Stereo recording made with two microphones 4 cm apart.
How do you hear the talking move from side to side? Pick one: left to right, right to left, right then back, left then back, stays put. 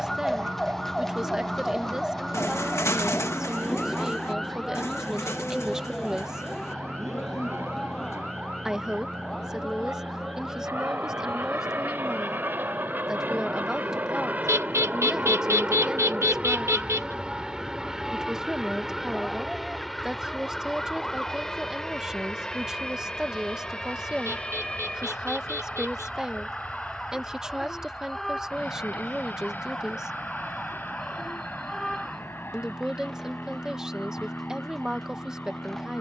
stays put.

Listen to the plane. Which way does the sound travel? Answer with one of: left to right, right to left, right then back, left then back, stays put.
right to left.